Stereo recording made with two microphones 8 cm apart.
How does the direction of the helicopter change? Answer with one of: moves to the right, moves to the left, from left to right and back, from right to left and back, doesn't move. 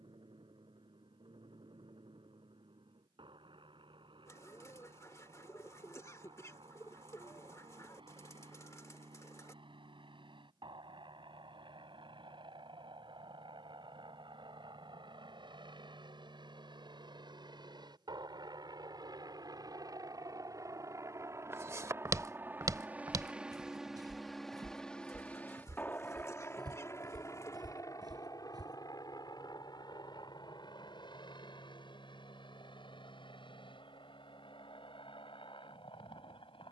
moves to the left.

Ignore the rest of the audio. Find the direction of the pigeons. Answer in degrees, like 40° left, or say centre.
40° left.